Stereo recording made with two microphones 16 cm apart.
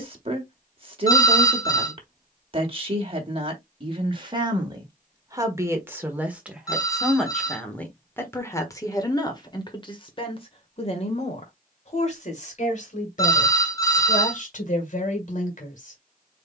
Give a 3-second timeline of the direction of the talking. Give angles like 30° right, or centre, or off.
40° right, 30° right, 10° left, 40° left, 50° left, 50° left.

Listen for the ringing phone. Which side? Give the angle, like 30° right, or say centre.
20° left.